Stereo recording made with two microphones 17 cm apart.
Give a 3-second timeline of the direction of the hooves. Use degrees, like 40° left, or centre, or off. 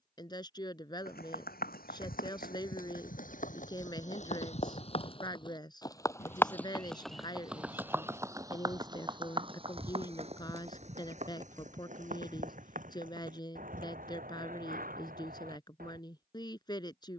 60° left, 40° left, 10° right, 40° right, 60° right, 60° right.